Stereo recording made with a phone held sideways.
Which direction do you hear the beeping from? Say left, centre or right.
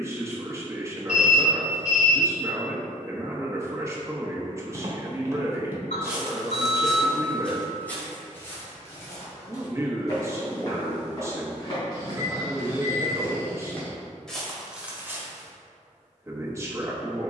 left.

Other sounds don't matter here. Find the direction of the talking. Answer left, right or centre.
right.